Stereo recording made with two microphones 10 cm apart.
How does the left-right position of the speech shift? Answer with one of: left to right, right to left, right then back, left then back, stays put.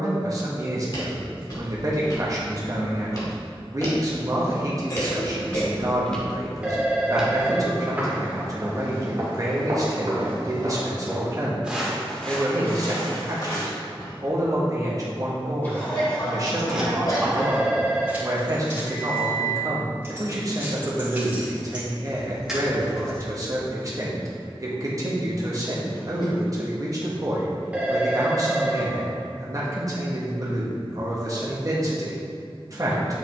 stays put.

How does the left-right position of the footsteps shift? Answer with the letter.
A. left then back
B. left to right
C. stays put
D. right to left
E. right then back
E.